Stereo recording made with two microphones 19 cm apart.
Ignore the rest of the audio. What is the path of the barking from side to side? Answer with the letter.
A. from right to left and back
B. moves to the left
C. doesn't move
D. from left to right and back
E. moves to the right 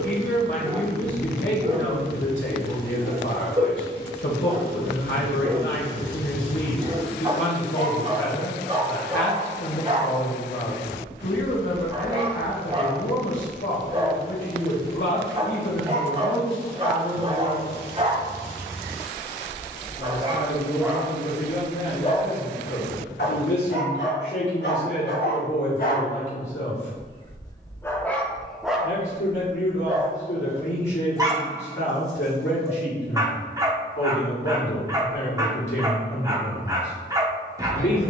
A.